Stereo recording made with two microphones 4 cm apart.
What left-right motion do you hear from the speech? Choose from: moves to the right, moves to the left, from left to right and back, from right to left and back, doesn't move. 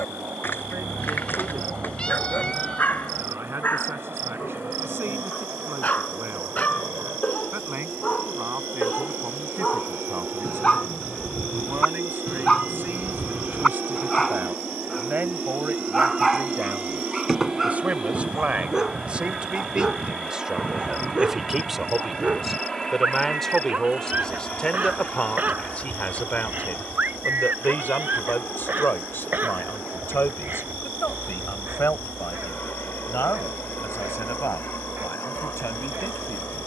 moves to the left.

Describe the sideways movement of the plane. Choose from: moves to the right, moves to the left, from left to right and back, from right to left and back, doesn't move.
moves to the left.